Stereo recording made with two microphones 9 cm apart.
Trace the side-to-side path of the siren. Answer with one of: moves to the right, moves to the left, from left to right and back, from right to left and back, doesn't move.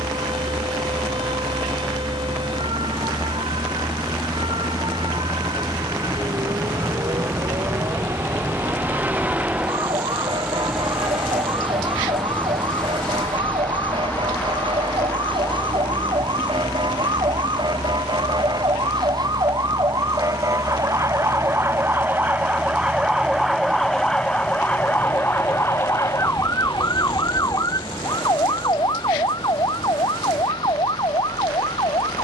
moves to the left.